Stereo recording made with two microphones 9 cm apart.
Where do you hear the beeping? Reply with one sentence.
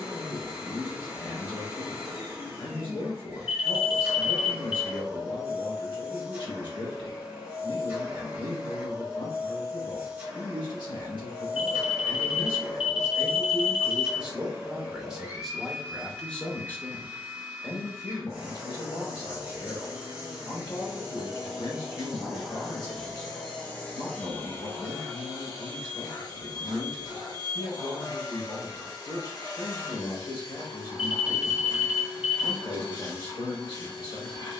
You can hear the beeping in the centre.